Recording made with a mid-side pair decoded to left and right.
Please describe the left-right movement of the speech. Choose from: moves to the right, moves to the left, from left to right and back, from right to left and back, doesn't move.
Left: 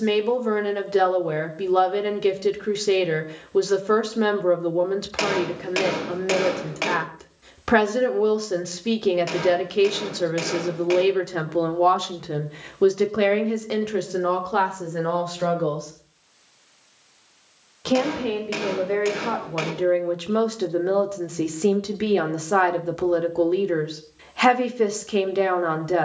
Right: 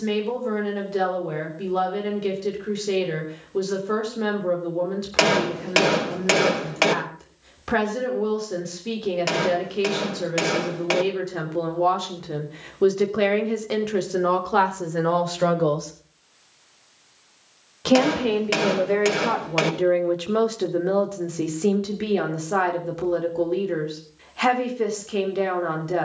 from left to right and back.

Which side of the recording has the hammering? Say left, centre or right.
right.